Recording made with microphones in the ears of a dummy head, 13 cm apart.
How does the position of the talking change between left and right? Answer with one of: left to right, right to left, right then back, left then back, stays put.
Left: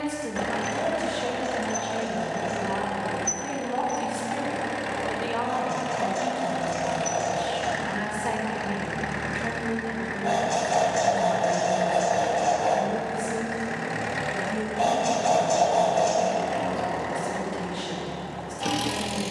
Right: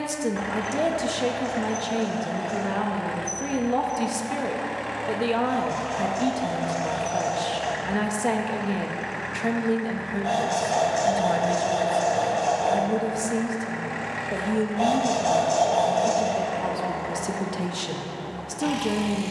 stays put.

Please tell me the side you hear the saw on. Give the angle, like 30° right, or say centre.
10° left.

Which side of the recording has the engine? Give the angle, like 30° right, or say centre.
40° left.